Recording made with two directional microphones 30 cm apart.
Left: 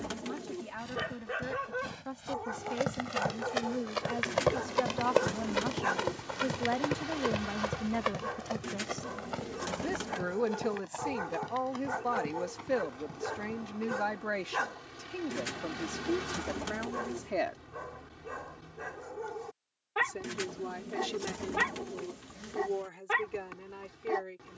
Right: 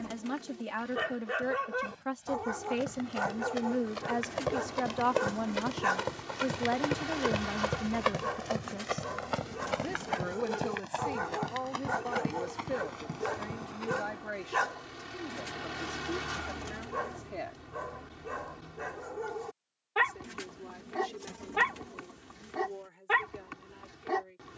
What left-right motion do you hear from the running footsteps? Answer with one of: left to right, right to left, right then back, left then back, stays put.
left to right.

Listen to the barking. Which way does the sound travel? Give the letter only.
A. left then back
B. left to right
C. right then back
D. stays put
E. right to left
D.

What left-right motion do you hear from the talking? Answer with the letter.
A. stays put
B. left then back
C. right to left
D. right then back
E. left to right
C.